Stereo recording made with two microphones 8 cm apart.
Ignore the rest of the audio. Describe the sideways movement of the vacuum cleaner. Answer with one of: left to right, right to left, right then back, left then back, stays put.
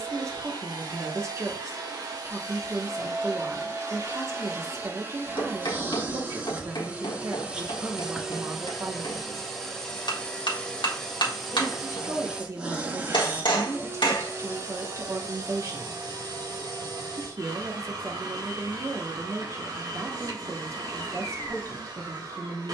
left then back.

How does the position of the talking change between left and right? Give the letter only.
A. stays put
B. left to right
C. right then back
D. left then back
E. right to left
A.